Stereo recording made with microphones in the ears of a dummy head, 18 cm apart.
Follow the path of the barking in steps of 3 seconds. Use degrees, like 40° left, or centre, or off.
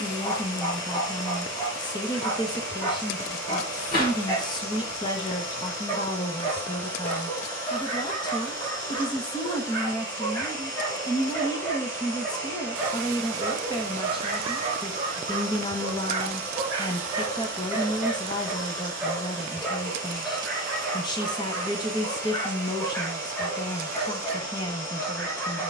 20° left, 20° left, 20° left, 10° left, 20° right, 20° right, centre, 10° left, 10° left.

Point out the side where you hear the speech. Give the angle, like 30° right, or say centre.
20° left.